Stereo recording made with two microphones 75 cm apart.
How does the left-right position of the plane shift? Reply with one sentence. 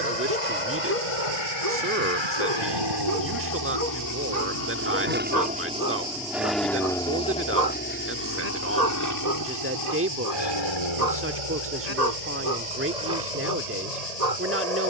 In this clip you hear the plane travel towards the left.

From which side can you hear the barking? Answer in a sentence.
In this clip you hear the barking on the right.